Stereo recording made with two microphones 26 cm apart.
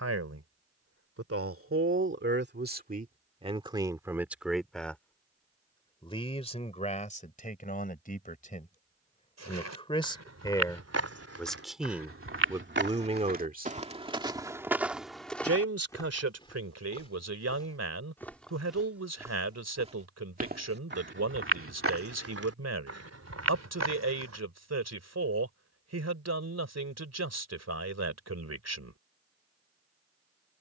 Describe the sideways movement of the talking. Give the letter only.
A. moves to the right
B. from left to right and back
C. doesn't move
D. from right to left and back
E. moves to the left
D.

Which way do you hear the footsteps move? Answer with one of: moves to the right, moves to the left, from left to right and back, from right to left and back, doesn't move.
from right to left and back.